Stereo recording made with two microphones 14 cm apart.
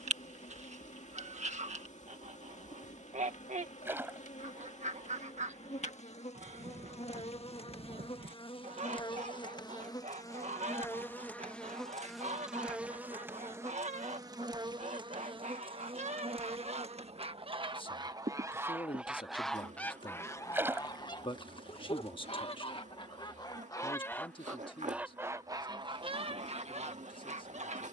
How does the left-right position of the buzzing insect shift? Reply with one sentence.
You can hear the buzzing insect go from the left side to the right.